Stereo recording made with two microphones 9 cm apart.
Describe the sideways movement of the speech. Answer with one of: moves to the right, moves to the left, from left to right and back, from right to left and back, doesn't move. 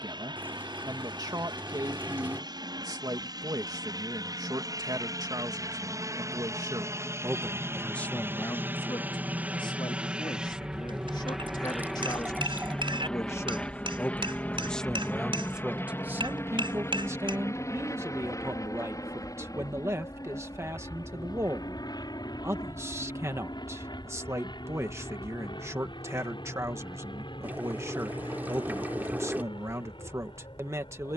from right to left and back.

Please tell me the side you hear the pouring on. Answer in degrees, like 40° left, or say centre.
20° right.